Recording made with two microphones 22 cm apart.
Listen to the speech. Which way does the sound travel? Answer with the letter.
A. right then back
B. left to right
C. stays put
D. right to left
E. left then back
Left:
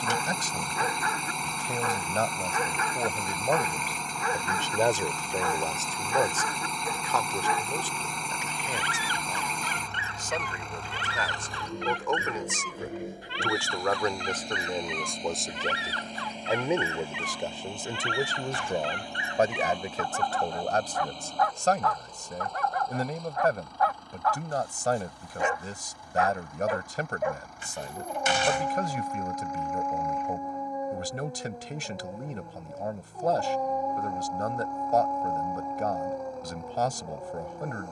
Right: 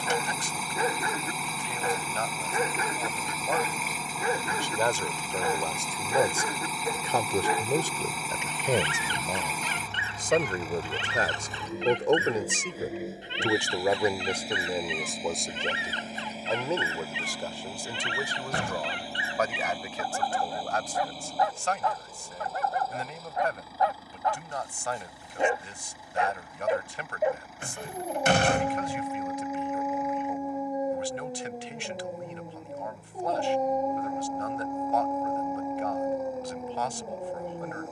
A.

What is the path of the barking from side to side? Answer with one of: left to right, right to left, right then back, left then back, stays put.
stays put.